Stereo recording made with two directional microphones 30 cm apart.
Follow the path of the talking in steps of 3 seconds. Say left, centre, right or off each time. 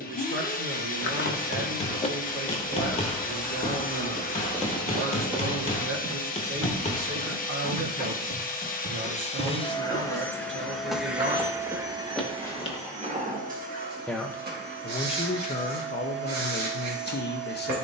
right, right, right, right, centre, left.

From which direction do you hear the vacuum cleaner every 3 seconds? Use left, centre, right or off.
left, left, left, centre, right, right.